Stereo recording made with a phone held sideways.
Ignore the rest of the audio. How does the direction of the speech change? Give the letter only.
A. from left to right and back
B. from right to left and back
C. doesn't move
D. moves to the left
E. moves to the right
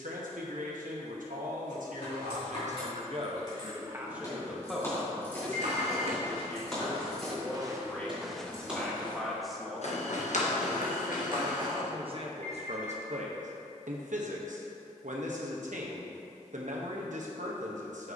B.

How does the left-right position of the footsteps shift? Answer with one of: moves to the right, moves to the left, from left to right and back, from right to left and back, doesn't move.
moves to the left.